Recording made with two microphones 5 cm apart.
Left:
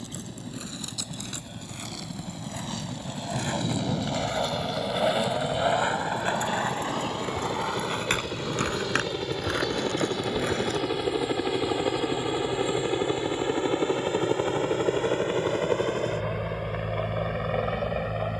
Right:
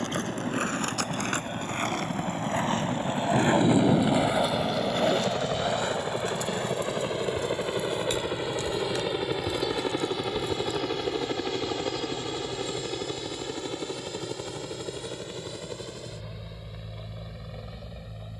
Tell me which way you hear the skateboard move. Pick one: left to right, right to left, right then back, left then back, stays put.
right to left.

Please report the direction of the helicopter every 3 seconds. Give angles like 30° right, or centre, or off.
50° right, 40° right, 20° right, centre, 30° left, 50° left.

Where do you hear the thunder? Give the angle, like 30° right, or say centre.
70° right.